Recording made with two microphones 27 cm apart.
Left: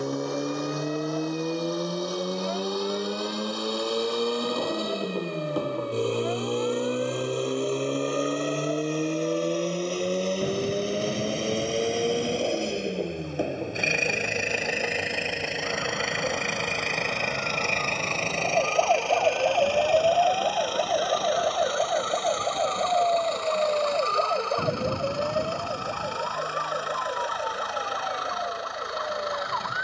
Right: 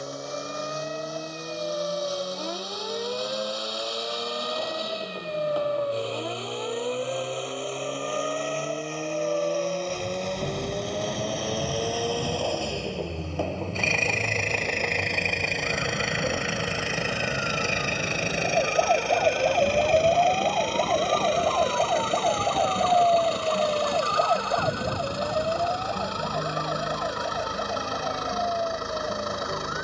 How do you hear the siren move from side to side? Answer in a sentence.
You can hear the siren go from the right side to the left.